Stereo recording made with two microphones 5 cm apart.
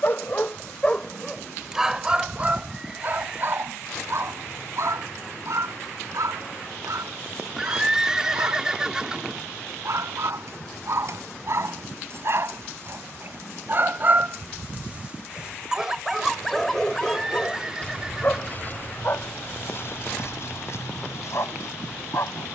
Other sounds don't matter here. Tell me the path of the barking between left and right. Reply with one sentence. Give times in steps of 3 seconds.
In this clip you hear the barking in the centre from 0 s, on the right from 3 s, in the centre from 15 s and on the left from 18 s.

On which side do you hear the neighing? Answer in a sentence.
In this clip you hear the neighing in the centre.